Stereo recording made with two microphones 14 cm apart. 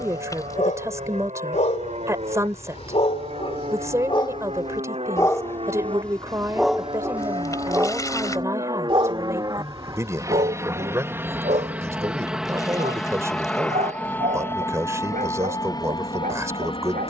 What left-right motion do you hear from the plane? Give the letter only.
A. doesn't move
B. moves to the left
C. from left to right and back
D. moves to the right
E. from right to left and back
B.